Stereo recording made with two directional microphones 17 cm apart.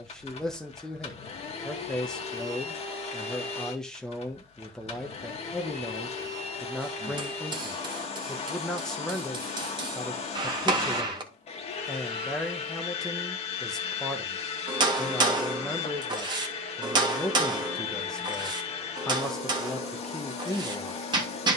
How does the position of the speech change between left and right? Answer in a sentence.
You can hear the speech stay put.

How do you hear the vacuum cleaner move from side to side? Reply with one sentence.
You can hear the vacuum cleaner stay in one place.